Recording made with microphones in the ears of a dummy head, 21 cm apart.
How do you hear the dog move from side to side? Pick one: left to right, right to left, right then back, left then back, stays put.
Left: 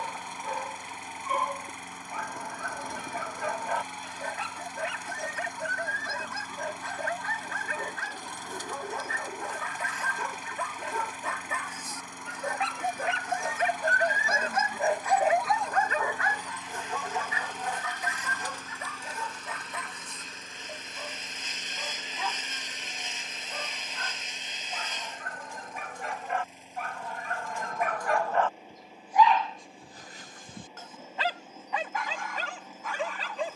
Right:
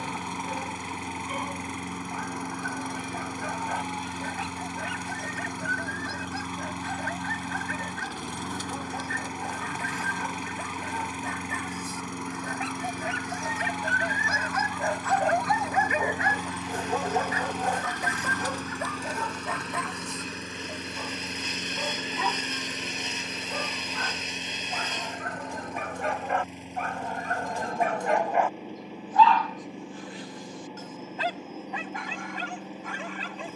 right then back.